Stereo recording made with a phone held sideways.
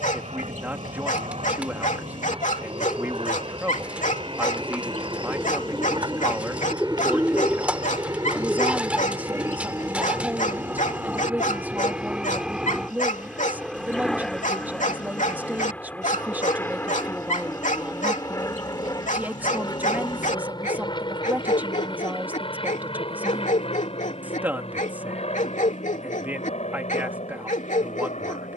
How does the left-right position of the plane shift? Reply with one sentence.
You can hear the plane move to the left.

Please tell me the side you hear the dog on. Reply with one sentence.
In this clip you hear the dog on the left.